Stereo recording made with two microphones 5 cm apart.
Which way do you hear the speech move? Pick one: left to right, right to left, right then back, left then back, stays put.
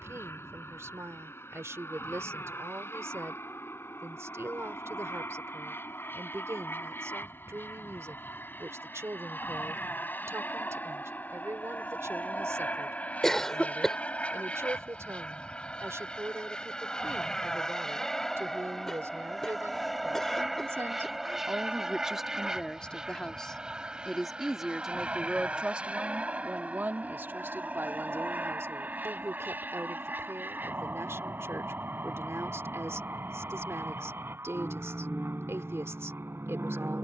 left then back.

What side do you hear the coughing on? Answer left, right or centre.
centre.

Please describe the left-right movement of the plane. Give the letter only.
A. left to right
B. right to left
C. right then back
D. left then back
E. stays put
A.